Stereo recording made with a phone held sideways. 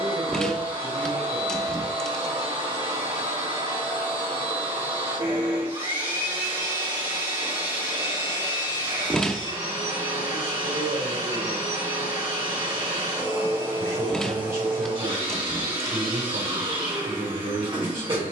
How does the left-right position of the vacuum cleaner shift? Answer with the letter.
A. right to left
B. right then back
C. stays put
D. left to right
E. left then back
C.